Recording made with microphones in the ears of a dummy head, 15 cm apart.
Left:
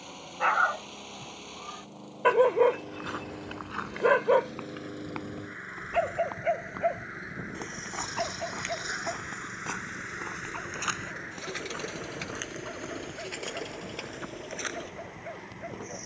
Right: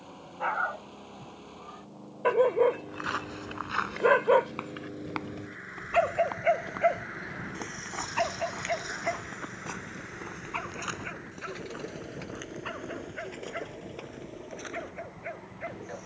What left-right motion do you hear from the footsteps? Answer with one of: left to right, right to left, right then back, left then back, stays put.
right to left.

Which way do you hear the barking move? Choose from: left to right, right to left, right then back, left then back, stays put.
left to right.